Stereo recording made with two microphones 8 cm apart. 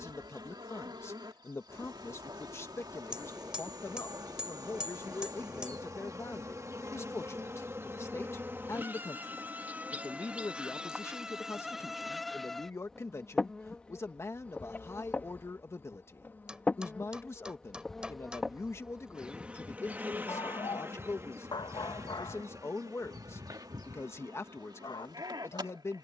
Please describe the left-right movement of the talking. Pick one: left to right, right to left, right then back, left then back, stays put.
stays put.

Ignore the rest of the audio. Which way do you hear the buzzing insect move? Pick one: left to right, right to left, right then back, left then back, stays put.
left then back.